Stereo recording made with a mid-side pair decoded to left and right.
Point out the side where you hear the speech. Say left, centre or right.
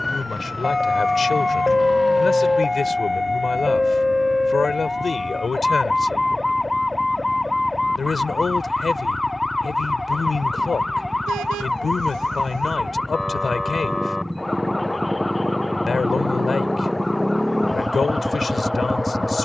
left.